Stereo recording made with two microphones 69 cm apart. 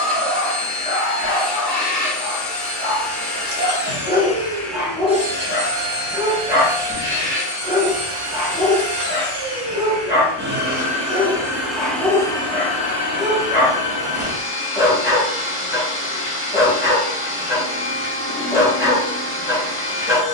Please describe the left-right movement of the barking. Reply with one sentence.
You can hear the barking stay in one place.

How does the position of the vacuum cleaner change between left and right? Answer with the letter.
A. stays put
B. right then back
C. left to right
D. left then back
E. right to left
B.